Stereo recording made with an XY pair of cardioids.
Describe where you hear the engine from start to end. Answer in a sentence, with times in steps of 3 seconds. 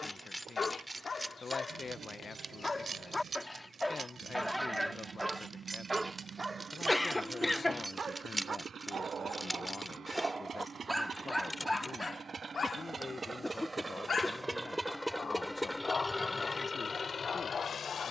In this clip you hear the engine on the right from 0 s and on the left from 15 s.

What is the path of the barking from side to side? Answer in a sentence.
In this clip you hear the barking go right and come back.